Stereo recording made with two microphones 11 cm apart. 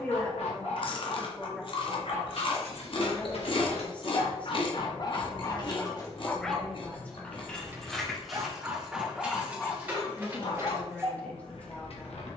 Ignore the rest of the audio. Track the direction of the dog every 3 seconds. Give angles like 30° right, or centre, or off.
70° left, 50° left, 10° right, 40° left.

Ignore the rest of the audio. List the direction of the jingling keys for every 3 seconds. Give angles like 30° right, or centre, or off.
80° left, 60° left, 10° left, 20° right.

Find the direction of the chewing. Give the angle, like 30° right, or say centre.
50° left.